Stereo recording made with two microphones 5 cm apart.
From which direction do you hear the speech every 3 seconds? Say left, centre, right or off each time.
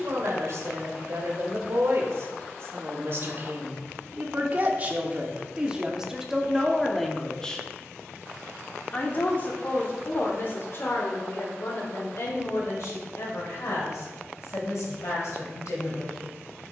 right, right, centre, left, left, left.